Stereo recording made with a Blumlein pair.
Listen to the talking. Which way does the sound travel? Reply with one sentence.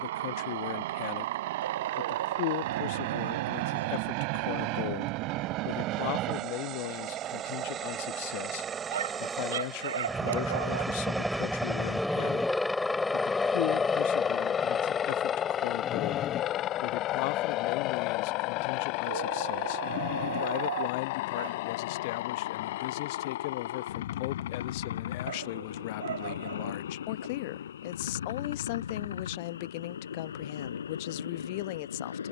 In this clip you hear the talking stay in one place.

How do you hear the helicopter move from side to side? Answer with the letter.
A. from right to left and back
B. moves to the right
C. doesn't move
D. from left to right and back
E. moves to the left
E.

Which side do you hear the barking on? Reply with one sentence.
You can hear the barking on the right.